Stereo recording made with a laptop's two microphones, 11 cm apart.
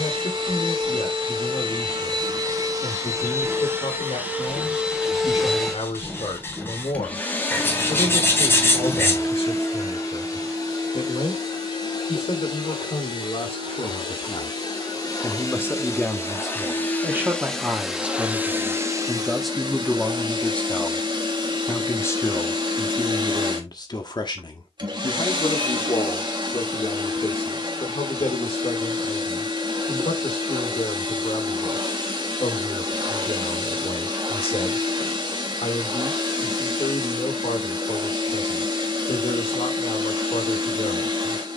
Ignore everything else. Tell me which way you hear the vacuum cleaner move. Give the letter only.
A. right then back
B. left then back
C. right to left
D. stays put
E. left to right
B.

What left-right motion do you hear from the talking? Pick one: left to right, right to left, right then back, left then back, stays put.
right then back.